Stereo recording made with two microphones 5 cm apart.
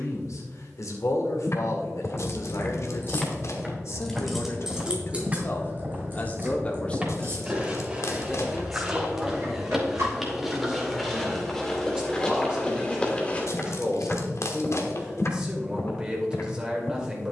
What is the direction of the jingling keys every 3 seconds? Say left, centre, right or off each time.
left, centre, right, right, off, off.